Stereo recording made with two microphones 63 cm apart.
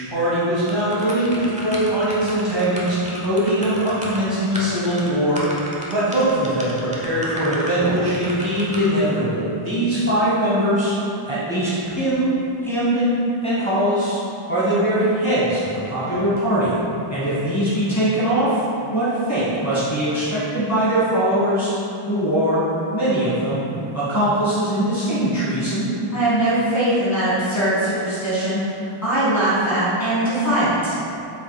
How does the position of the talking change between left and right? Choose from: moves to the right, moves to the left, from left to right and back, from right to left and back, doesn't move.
moves to the left.